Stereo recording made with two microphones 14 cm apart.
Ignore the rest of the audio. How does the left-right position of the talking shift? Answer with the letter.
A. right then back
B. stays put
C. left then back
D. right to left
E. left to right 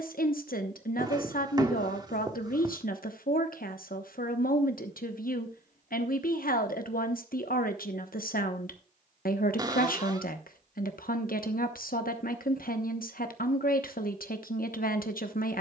B.